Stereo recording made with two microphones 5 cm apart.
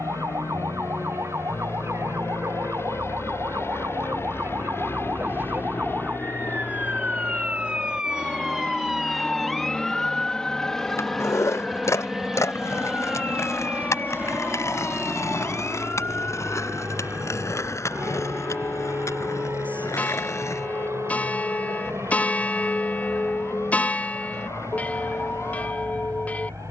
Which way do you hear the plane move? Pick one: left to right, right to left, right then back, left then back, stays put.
left to right.